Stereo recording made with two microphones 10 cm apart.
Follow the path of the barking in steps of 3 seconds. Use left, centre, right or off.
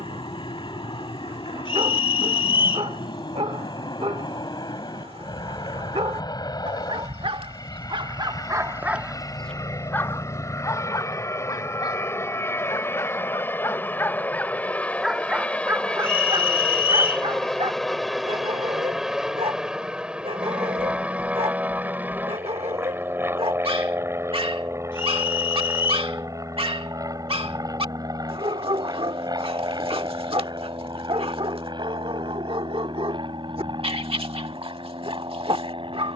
right, right, right, left, left, right, right, right, right, right, right, right.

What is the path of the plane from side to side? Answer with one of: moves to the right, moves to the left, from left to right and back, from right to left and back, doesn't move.
moves to the right.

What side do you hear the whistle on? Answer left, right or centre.
left.